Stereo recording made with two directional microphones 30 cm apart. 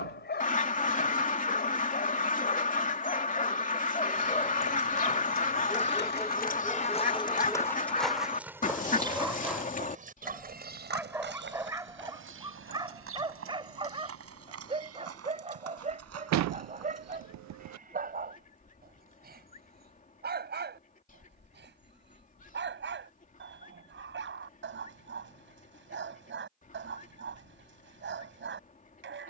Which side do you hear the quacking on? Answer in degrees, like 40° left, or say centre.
30° left.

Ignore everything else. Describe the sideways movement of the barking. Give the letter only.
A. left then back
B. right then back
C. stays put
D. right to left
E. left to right
E.